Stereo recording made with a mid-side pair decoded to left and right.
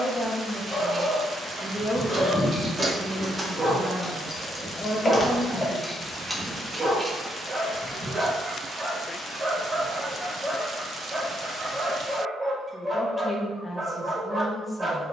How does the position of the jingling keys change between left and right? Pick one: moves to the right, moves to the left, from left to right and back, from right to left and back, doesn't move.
from right to left and back.